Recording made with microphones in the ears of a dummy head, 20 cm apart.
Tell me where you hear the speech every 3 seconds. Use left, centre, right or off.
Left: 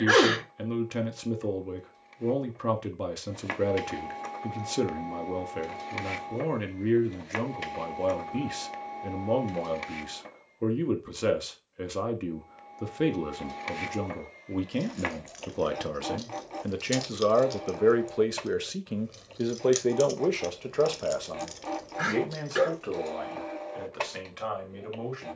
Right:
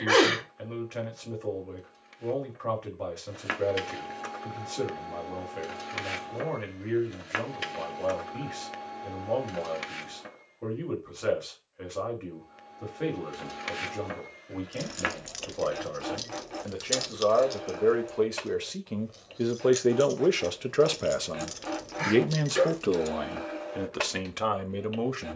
left, left, left, left, left, left, centre, right, right.